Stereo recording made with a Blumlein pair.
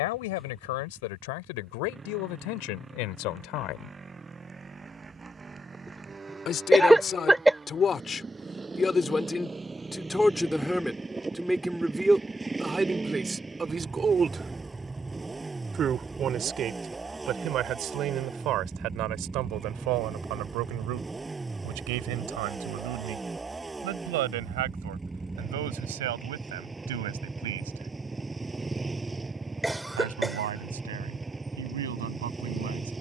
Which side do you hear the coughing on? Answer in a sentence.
In this clip you hear the coughing in the centre.